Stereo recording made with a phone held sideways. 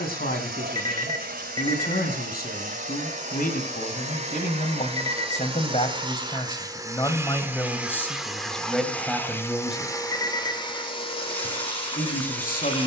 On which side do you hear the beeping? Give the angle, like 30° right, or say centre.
20° left.